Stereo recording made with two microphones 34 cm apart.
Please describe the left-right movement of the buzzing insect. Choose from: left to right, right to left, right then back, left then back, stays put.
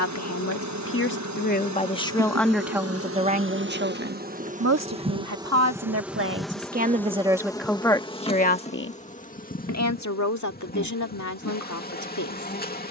right to left.